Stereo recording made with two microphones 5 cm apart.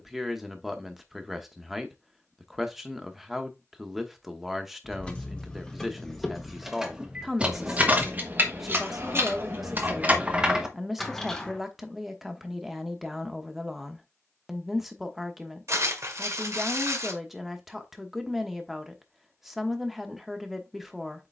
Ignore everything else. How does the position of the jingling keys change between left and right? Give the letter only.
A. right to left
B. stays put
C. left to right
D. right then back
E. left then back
D.